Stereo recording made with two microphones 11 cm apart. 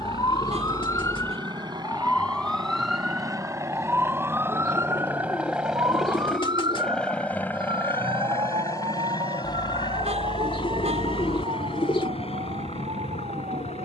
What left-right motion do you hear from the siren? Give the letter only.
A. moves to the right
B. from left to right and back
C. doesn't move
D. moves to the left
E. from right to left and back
A.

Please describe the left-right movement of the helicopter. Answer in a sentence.
In this clip you hear the helicopter travel towards the left.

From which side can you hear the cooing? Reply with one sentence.
You can hear the cooing on the left.